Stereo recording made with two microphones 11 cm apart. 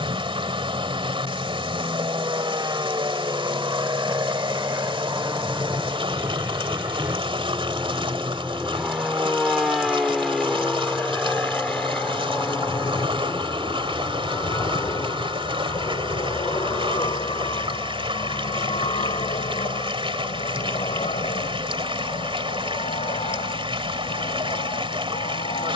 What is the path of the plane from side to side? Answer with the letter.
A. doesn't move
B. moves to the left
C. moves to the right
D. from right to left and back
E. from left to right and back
B.